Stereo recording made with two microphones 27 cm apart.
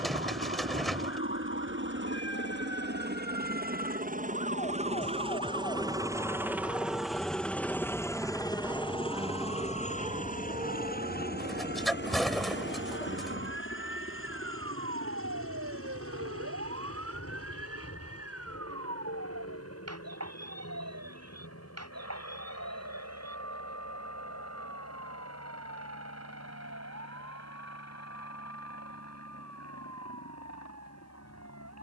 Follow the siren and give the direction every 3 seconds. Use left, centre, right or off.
left, left, centre, right, right, right, right, right, right, right, right.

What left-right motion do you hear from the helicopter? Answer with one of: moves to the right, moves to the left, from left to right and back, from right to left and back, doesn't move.
moves to the left.